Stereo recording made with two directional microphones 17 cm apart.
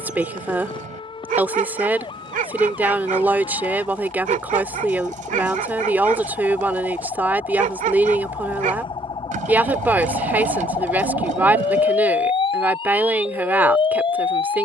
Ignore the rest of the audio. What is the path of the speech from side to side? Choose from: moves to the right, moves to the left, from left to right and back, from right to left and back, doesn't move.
doesn't move.